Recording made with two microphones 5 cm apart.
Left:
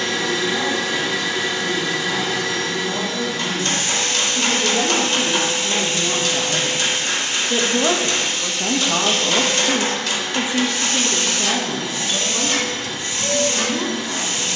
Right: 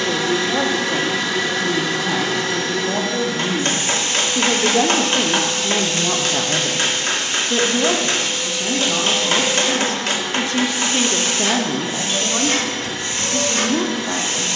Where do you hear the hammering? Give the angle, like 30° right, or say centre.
50° right.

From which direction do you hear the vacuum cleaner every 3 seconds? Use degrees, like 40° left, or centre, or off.
50° right, 10° right, centre, 20° right, 40° right.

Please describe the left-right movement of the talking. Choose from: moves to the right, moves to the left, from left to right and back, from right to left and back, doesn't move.
from right to left and back.